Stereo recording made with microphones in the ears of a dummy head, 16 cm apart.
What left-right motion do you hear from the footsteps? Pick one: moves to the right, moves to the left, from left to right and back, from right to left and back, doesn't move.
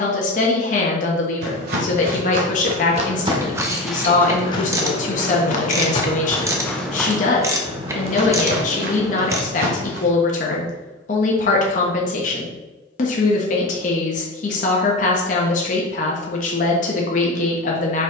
from right to left and back.